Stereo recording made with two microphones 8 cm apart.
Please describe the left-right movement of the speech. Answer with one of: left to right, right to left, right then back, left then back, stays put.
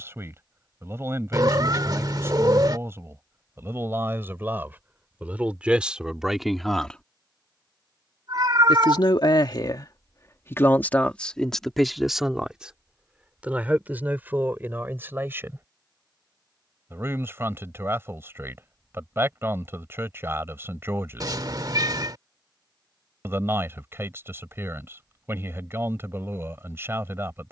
left then back.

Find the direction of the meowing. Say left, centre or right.
right.